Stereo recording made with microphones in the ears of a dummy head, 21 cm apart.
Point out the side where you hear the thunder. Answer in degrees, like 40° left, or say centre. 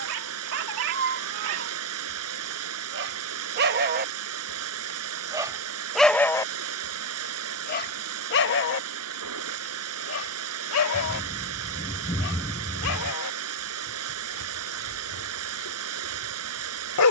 10° left.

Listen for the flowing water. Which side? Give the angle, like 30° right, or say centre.
70° right.